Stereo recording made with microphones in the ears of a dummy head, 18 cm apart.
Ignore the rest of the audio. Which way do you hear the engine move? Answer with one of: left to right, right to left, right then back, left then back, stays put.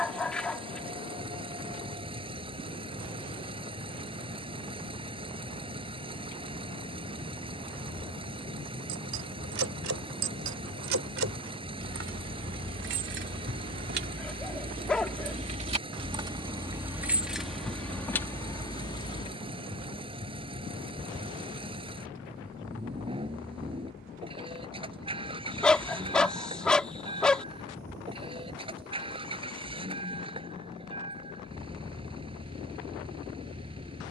stays put.